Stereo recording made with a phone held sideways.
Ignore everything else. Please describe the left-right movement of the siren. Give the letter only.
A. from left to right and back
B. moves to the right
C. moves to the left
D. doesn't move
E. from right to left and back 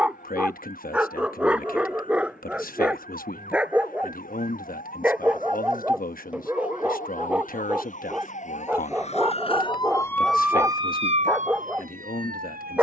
B.